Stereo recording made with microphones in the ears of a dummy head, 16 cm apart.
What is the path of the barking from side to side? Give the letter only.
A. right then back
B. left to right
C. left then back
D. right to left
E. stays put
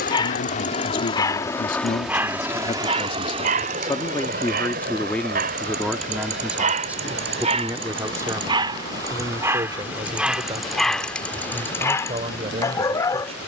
A.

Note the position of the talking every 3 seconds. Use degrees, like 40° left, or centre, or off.
50° left, 10° left, 10° right, 30° right, 40° right.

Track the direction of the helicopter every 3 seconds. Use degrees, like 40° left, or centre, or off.
20° left, 40° right, 60° right, 70° right, 70° right.